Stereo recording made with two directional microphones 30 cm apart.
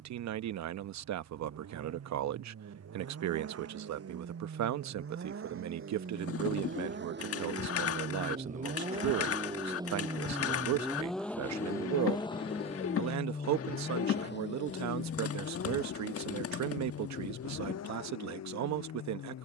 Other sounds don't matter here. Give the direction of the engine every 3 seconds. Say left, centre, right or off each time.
right, right, right, centre, left, left, left.